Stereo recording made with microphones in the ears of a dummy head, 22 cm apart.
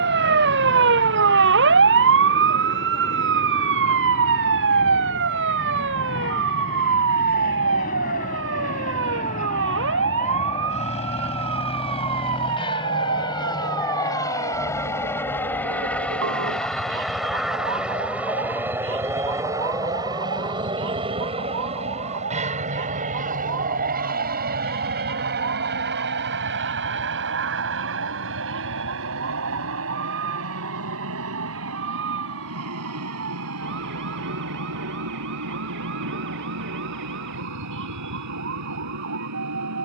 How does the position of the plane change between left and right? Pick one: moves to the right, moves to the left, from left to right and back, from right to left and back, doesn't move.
moves to the right.